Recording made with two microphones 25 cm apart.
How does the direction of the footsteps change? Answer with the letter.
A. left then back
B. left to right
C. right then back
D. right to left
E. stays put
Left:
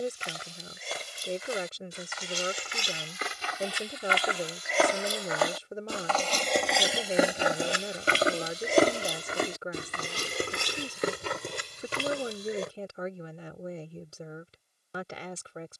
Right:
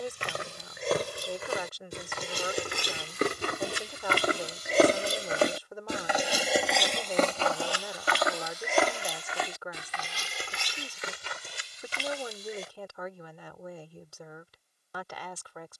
D.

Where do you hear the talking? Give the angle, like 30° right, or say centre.
30° left.